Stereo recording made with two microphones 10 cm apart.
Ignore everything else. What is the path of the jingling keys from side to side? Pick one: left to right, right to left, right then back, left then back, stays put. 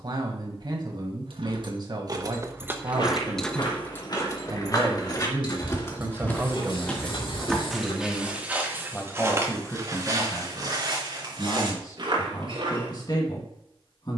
right to left.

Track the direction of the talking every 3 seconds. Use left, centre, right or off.
right, right, centre, left, left.